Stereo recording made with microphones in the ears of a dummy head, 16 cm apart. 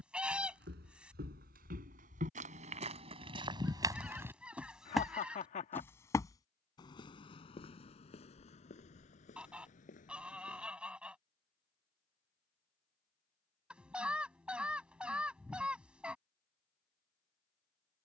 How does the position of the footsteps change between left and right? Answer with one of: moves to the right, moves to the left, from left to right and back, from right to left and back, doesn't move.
moves to the left.